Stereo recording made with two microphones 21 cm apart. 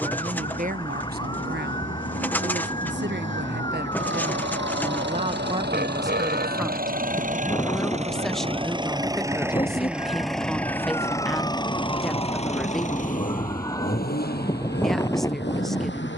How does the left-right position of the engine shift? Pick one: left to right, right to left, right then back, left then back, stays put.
right to left.